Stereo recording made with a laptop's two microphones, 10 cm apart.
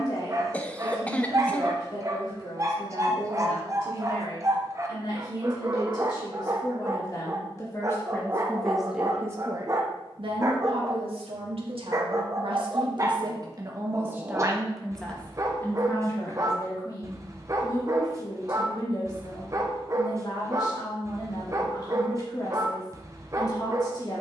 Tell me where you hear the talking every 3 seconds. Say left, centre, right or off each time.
left, left, left, right, right, left, left, left.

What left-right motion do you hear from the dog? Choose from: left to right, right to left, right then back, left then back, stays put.
stays put.